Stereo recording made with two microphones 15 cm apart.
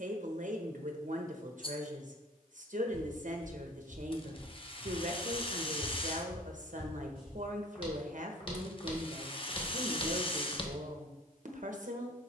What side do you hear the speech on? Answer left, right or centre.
right.